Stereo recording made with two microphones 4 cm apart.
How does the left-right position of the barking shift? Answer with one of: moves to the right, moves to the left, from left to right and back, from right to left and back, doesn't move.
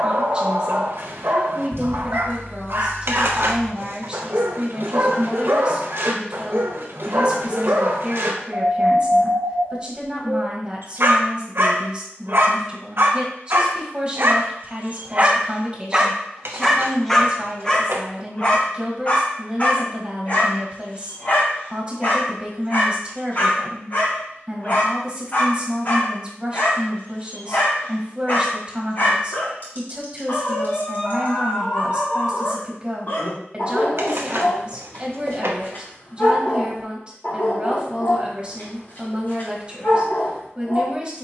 moves to the left.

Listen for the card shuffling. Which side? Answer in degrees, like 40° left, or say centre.
70° right.